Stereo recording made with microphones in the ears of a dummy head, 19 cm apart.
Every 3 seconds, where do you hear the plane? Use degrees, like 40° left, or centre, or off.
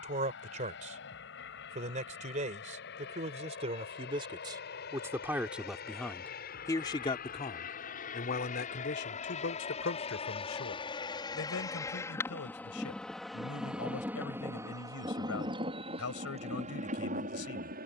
60° left, 60° left, 40° left, 30° left, centre, 30° right.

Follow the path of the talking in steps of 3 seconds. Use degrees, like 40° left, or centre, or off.
40° right, 20° right, 30° left, 70° left, 80° left, 80° left.